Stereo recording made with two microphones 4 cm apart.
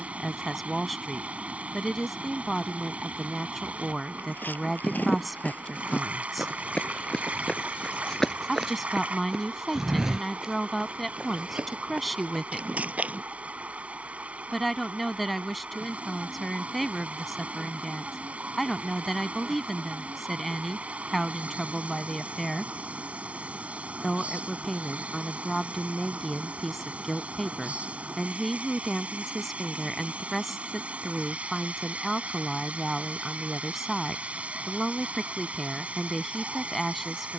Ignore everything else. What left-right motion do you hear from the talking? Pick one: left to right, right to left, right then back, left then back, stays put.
stays put.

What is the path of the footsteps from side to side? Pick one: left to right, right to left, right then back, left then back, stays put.
left to right.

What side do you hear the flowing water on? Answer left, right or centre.
right.